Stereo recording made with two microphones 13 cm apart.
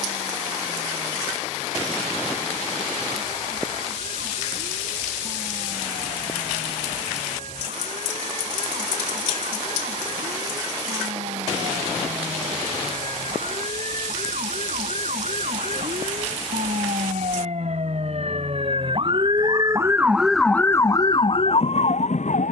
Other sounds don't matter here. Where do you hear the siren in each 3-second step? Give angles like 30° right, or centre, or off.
80° right, 80° right, 80° right, 70° right, 70° right, 60° right, 20° right, 50° left.